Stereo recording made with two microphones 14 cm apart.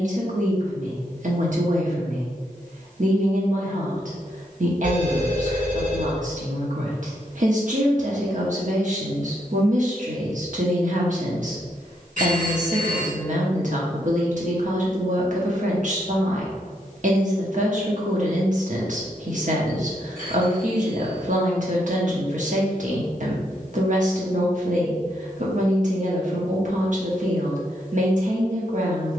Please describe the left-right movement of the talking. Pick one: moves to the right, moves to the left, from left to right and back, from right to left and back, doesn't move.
doesn't move.